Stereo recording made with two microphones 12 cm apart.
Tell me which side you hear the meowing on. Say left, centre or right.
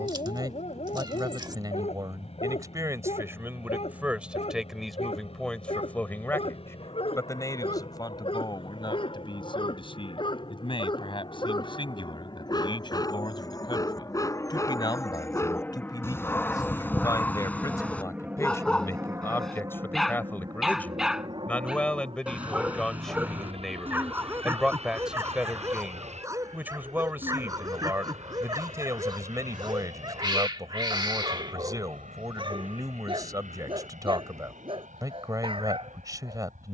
right.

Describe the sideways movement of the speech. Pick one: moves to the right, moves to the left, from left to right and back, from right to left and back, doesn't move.
from right to left and back.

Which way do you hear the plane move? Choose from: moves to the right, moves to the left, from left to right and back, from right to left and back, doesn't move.
moves to the right.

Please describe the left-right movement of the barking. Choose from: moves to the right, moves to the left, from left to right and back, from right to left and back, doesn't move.
moves to the right.